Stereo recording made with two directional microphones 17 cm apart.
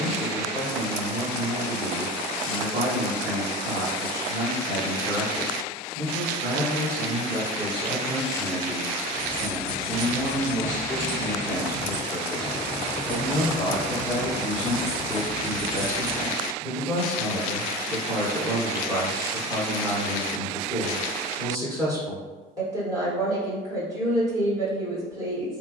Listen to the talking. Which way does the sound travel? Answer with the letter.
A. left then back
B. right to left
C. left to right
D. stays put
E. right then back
A.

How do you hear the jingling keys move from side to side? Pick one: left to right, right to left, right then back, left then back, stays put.
right to left.